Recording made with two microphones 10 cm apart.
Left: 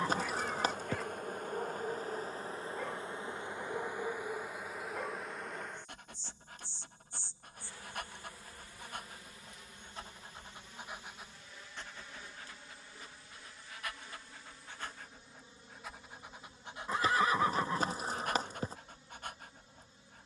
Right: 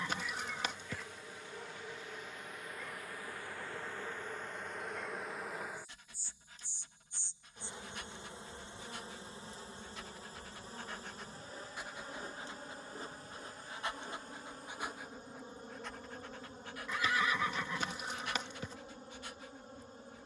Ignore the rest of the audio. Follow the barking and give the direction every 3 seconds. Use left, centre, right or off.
left, left, left, left, right, centre, left.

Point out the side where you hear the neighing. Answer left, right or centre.
left.